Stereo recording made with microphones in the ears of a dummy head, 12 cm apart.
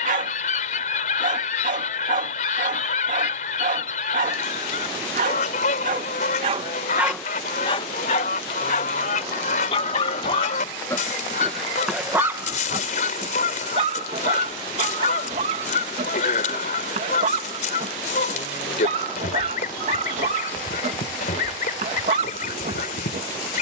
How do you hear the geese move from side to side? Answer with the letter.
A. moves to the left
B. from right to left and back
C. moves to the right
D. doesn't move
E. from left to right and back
D.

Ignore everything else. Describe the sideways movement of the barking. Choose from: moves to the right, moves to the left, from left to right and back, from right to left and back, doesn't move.
from right to left and back.